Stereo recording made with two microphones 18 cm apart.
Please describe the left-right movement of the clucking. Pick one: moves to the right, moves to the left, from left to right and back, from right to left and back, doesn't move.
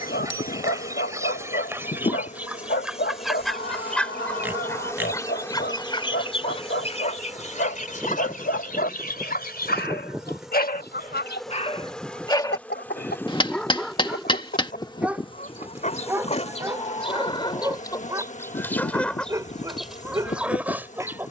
from right to left and back.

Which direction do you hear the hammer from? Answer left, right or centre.
left.